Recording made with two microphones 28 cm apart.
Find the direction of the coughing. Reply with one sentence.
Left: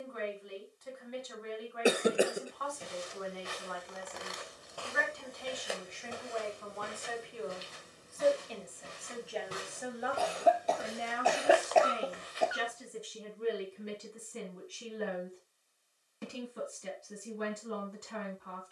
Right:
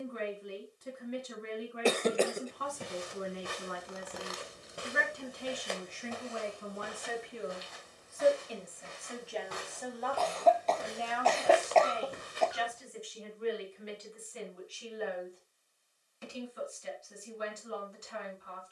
In this clip you hear the coughing in the centre.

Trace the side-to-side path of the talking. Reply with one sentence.
In this clip you hear the talking go from the right side to the left.